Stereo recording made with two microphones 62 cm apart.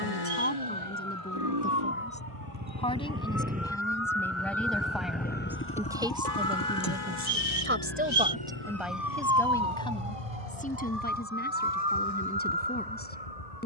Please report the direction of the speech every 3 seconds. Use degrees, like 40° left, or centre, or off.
10° left, centre, 10° right, 10° left, 20° left.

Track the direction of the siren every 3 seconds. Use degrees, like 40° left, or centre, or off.
60° left, 50° left, 10° left, 60° right, 80° right.